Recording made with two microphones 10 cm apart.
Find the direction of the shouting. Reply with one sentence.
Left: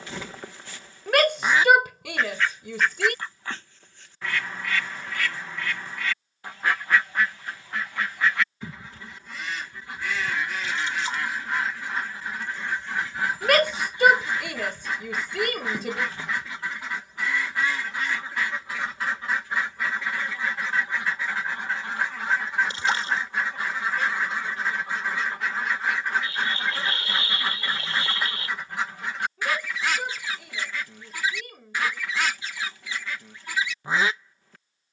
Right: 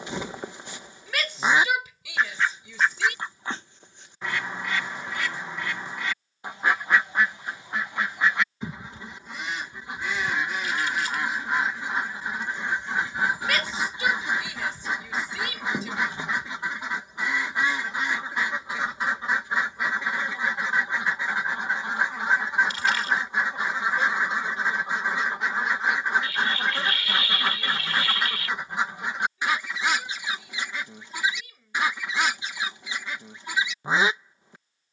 In this clip you hear the shouting on the left.